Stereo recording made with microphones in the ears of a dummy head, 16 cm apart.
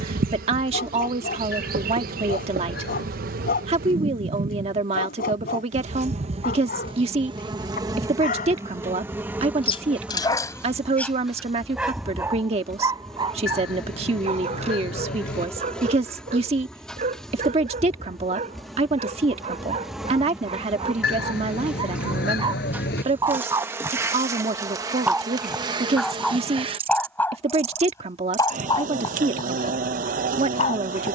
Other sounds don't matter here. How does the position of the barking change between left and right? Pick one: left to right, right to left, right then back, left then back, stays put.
right then back.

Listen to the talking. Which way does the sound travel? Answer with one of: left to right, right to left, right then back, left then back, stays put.
stays put.